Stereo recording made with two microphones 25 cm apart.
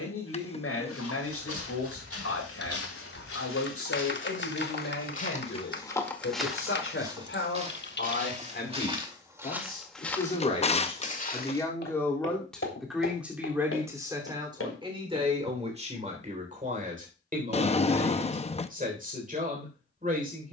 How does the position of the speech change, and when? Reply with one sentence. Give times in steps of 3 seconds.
In this clip you hear the speech on the left from 0 s, in the centre from 12 s and on the right from 15 s.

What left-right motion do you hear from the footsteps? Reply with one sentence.
In this clip you hear the footsteps move from left to right and back again.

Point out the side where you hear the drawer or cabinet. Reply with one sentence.
In this clip you hear the drawer or cabinet on the left.